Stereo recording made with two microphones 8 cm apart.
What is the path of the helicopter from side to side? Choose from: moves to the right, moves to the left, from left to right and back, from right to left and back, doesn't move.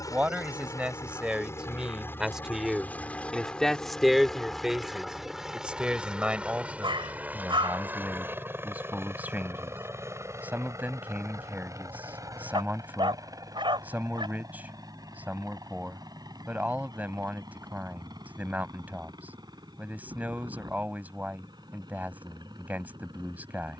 moves to the right.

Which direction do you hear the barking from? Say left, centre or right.
right.